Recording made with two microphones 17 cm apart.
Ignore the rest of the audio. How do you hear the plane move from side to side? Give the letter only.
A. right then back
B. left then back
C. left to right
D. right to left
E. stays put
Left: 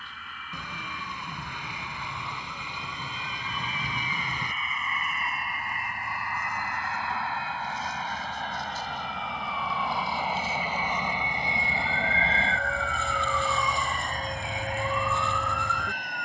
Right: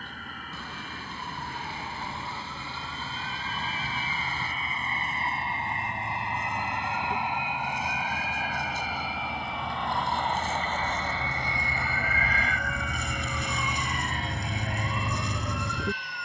D.